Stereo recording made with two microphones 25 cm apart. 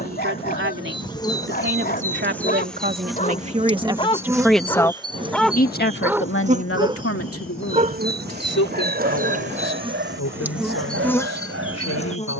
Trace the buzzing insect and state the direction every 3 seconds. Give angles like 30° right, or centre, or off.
10° left, 10° right, 30° right, 10° right.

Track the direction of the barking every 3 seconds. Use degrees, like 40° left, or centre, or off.
40° left, 20° left, 30° right, 50° right.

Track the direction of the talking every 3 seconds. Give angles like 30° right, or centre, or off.
50° right, centre, 60° left, 80° left.